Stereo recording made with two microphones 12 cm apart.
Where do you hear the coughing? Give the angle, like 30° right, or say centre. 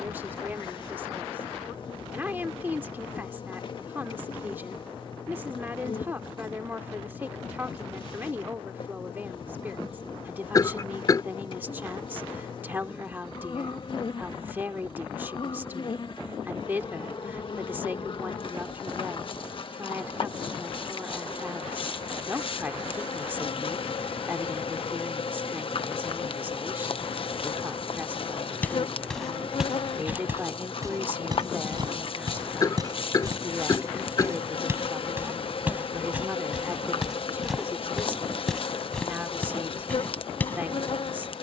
30° left.